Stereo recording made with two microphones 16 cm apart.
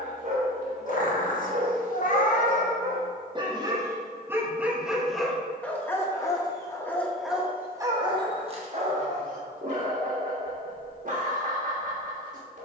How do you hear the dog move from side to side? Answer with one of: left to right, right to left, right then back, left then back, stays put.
left then back.